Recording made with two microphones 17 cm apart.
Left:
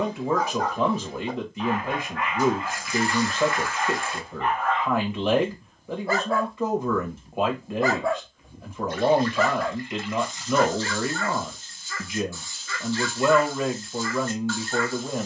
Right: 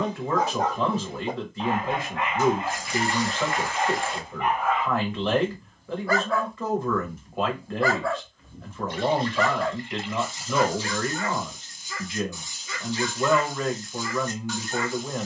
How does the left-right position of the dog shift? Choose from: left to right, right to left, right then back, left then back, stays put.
left then back.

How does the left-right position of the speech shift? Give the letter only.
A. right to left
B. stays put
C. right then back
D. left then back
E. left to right
B.